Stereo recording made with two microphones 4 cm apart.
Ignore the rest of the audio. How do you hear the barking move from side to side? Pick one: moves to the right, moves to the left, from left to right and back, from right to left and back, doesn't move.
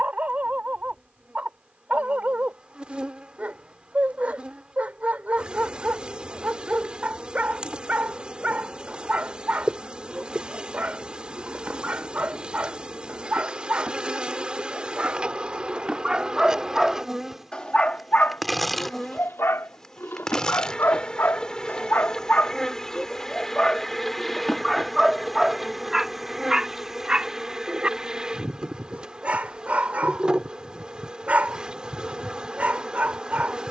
from right to left and back.